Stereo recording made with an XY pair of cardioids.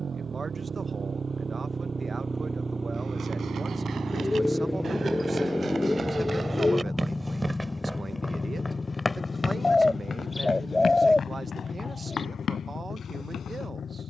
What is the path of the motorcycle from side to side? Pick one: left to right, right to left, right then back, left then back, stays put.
right to left.